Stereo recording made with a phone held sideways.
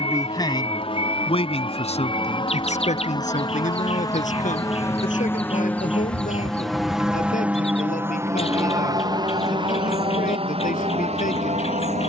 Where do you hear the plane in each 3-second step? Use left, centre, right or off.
left, left, centre, right.